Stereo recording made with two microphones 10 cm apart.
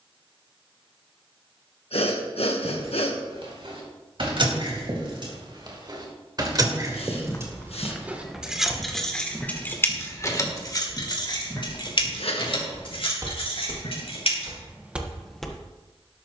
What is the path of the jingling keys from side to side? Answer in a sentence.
You can hear the jingling keys go from the right side to the left.